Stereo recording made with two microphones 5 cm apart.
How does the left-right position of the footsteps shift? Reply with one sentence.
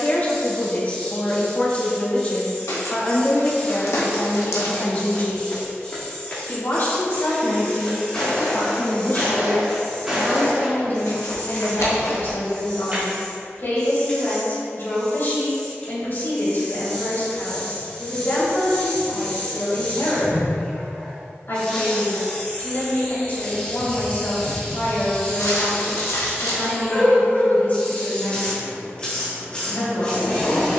You can hear the footsteps travel towards the right.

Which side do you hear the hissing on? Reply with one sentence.
You can hear the hissing on the left.